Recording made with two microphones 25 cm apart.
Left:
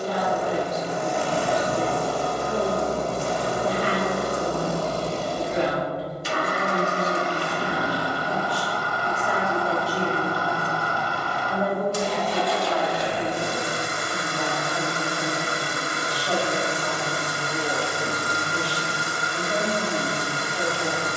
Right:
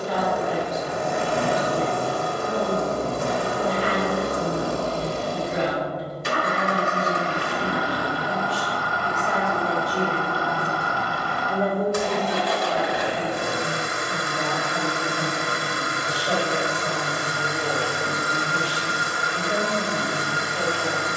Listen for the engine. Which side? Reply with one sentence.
You can hear the engine on the right.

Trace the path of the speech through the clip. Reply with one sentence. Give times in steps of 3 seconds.
You can hear the speech on the left from 0 s, in the centre from 9 s and on the right from 12 s.